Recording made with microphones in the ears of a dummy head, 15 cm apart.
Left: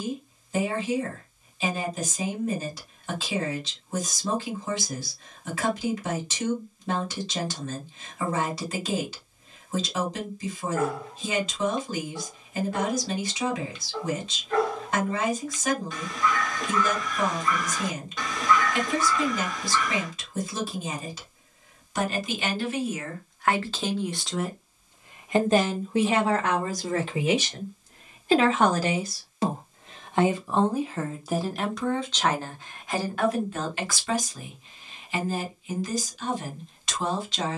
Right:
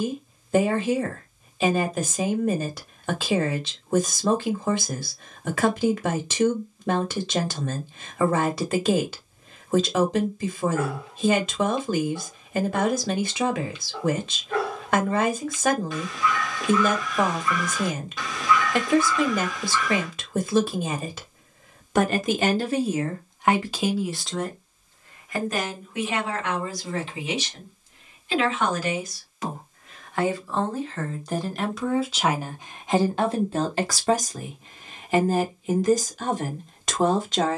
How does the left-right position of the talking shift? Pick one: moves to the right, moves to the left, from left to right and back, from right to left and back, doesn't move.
from right to left and back.